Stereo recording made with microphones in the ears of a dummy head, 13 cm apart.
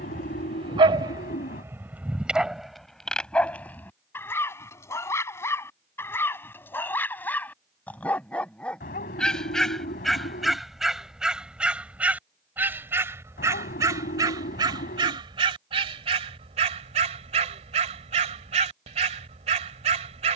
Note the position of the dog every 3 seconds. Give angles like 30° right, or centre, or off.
20° right, 20° left, 10° left, centre, 20° right, 50° right, 50° right.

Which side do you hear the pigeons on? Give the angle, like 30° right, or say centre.
70° left.